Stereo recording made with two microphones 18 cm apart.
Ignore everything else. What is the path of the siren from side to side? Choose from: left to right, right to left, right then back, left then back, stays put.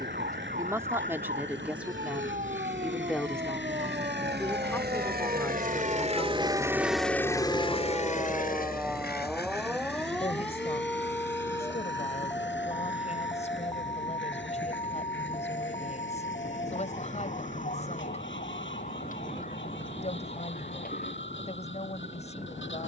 right to left.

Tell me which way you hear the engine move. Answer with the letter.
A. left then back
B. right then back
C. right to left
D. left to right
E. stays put
C.